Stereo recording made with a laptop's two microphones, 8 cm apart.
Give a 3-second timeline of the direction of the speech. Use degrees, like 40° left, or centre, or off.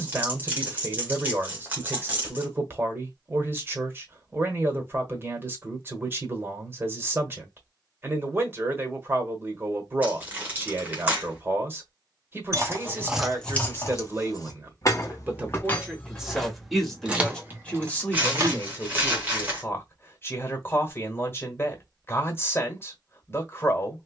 30° right, 30° right, 30° right, 30° right, 30° right, centre, 30° left, 30° left.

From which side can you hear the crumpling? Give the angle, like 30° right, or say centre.
20° right.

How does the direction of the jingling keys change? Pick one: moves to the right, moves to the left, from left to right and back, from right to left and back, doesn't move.
from right to left and back.